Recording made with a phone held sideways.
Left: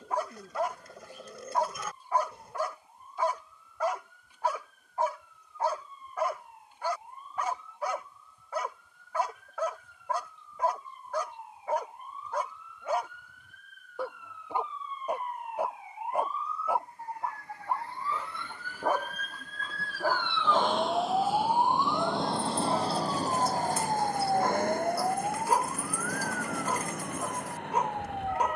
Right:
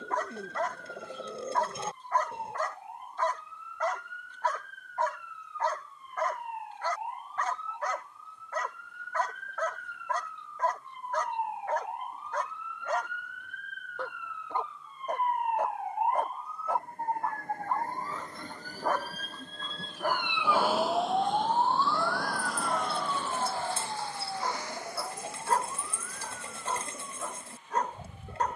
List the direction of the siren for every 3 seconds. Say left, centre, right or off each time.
right, right, right, right, right, right, right, left, left, left.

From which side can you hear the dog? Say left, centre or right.
centre.